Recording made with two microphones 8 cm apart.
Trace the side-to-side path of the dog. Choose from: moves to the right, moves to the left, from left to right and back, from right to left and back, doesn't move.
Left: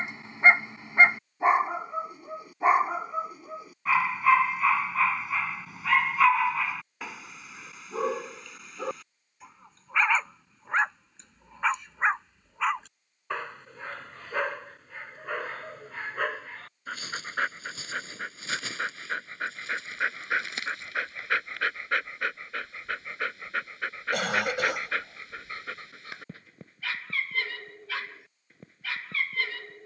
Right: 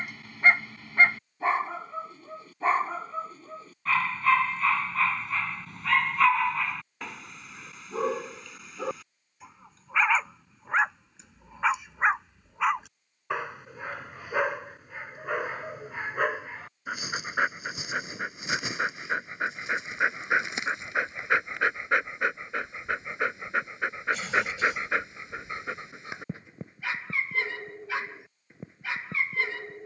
moves to the right.